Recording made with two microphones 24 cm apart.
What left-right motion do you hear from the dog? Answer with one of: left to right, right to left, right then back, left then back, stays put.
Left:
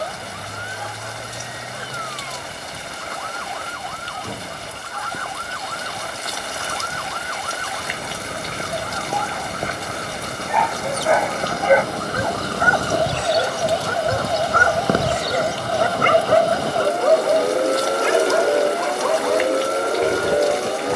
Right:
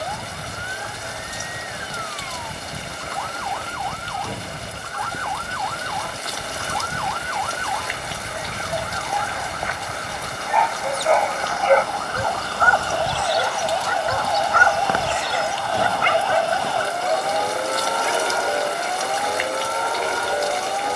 right to left.